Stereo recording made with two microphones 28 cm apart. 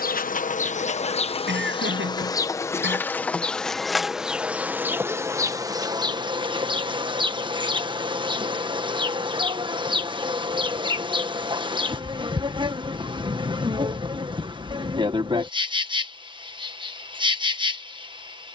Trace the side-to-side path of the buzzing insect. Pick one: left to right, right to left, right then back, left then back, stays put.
left to right.